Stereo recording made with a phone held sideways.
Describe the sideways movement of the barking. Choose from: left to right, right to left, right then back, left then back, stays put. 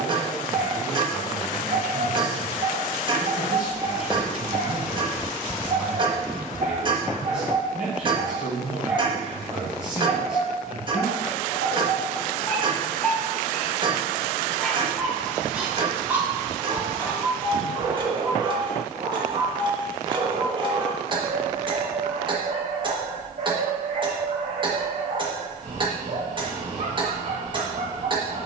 left then back.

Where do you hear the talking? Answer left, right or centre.
centre.